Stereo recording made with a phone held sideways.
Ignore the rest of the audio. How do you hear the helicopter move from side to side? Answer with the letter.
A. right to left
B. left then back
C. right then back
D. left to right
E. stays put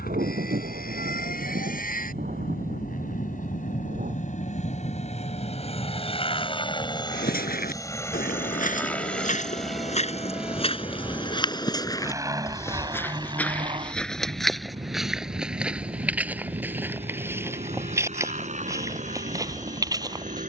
D.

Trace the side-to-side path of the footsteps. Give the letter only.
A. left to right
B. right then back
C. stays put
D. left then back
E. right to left
A.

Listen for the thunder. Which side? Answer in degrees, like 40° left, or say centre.
60° right.